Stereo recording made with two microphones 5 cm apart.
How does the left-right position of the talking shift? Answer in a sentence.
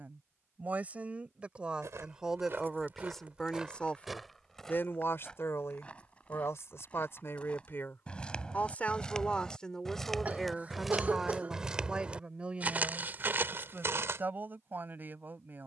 In this clip you hear the talking go left and come back.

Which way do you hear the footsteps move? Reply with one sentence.
In this clip you hear the footsteps go left and come back.